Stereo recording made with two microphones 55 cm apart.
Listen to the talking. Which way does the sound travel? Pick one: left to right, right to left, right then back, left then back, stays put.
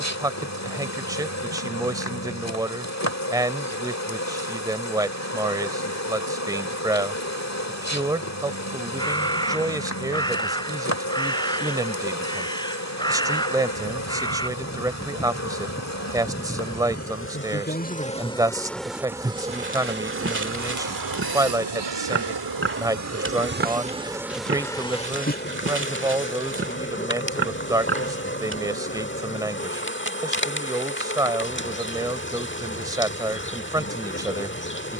stays put.